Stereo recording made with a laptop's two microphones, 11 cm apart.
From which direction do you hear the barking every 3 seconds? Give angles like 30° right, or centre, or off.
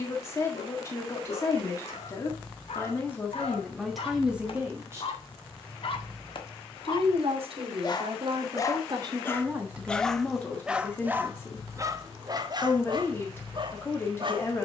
70° left, 60° left, 40° left, 10° right, 40° right.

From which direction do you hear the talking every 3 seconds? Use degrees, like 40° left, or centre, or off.
30° left, centre, 60° right, centre, 20° left.